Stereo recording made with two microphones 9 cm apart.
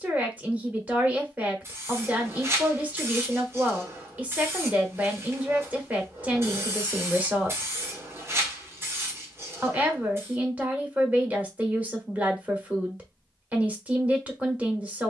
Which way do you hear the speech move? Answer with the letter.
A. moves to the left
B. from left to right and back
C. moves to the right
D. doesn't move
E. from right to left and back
D.